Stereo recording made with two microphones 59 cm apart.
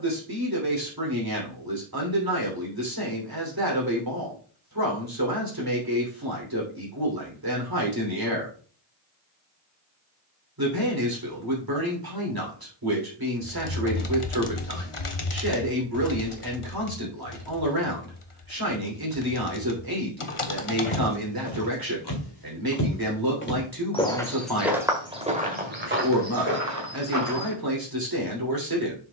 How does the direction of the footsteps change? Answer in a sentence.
In this clip you hear the footsteps go from the left side to the right.